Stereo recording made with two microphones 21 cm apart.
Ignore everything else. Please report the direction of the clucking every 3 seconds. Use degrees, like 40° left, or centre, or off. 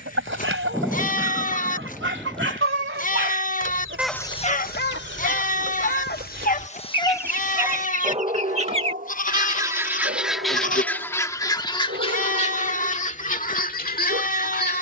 80° right, 70° right, 50° right, centre, 40° left.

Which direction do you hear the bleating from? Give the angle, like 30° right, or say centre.
40° left.